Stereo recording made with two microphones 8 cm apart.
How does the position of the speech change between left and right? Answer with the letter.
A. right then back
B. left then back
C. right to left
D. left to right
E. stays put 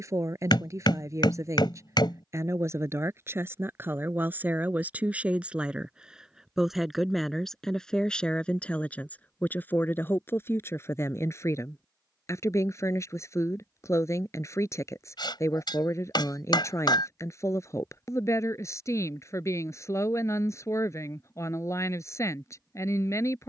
C.